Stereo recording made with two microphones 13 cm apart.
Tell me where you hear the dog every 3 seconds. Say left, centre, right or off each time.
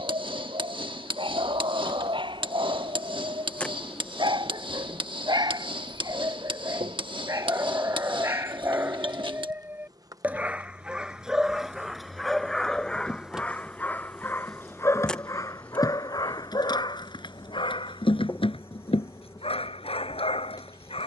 right, right, right, centre, centre, left, left.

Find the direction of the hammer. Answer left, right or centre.
right.